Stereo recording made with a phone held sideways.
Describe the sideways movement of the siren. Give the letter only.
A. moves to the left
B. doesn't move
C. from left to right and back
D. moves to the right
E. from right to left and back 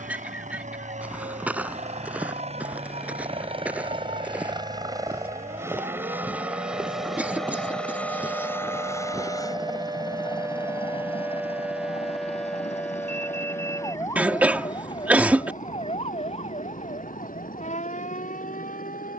A.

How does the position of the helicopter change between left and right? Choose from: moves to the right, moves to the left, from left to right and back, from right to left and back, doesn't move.
moves to the left.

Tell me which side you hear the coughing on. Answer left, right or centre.
centre.